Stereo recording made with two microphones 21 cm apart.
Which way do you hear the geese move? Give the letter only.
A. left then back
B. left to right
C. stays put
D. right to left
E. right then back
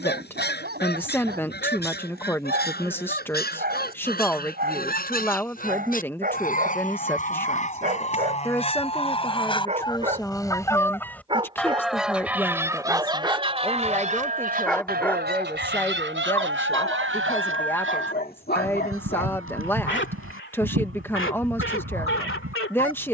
B.